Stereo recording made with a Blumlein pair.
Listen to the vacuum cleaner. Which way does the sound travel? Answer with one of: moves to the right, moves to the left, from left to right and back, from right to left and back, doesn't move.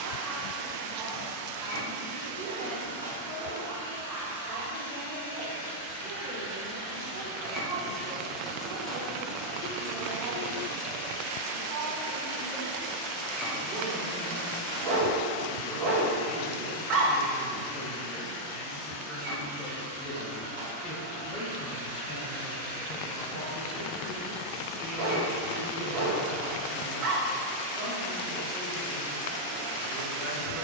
from right to left and back.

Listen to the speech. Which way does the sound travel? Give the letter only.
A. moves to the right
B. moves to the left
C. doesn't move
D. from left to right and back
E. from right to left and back
E.